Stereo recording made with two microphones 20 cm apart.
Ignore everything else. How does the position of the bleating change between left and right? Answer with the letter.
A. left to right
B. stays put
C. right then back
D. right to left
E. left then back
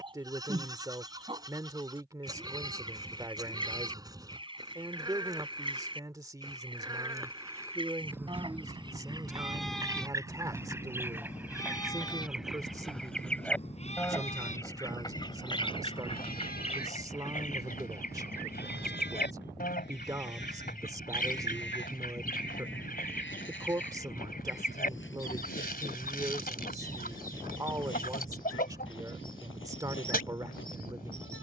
D.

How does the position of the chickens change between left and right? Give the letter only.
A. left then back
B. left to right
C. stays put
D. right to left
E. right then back
D.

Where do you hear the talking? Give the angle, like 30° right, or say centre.
20° right.